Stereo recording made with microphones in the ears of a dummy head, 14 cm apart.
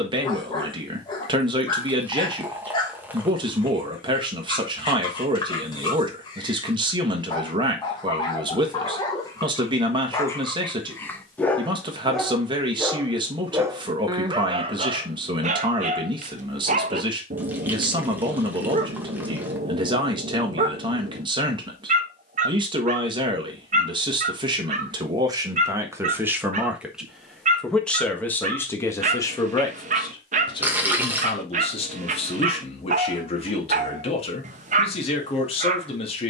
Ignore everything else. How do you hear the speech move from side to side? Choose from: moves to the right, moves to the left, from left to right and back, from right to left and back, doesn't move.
moves to the left.